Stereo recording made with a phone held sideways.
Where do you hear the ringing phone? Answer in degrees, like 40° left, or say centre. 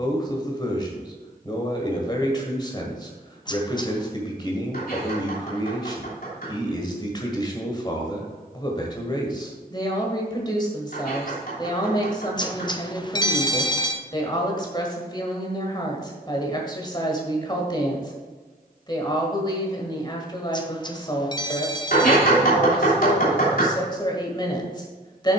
30° left.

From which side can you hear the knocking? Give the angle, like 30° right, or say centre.
70° left.